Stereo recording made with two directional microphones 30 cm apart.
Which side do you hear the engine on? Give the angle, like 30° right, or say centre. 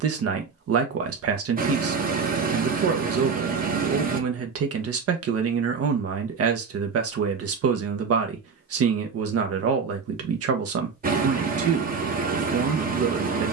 30° right.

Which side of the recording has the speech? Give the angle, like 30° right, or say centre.
50° right.